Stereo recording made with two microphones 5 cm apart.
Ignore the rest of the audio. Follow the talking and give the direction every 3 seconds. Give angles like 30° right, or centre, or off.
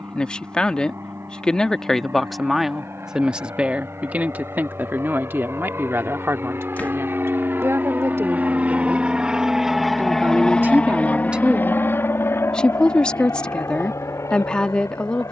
10° left, 40° right, 60° right, 30° right, 20° left.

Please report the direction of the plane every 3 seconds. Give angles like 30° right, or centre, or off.
70° right, 70° right, 50° right, 10° left, 60° left.